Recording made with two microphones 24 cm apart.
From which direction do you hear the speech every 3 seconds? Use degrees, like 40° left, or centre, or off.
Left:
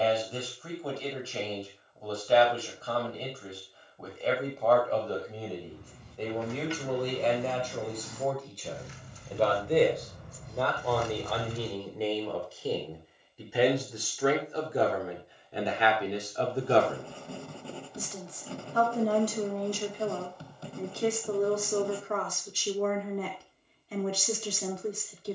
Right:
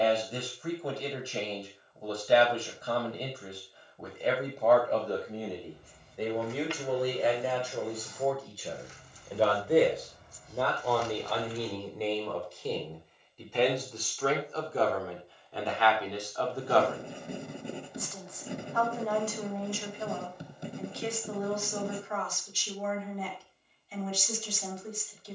20° right, 20° right, 10° right, centre, 10° left, 20° left, 40° left, 60° left, 60° left.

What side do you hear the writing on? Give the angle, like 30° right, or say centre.
20° right.